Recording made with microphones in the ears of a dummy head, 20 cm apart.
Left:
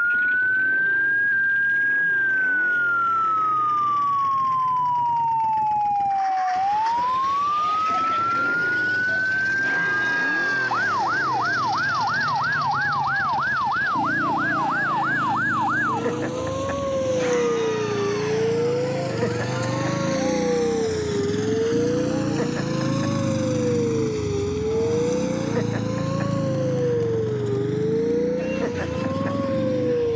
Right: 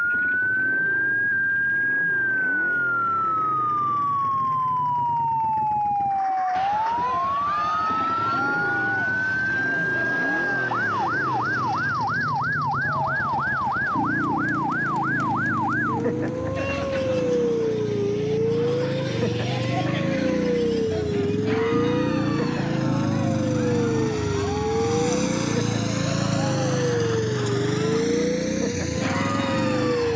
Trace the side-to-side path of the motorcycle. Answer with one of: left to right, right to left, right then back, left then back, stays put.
left to right.